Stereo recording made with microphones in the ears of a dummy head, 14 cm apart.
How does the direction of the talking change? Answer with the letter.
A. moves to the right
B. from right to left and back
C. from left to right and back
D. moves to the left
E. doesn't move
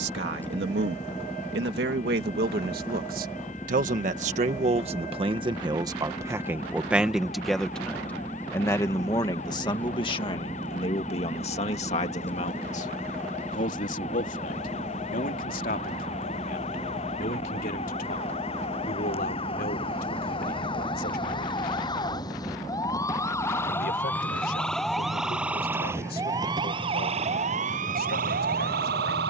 D.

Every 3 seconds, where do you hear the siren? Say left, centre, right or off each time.
left, left, left, left, left, left, left, left, centre, right.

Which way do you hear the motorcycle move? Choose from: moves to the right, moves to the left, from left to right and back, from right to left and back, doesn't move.
doesn't move.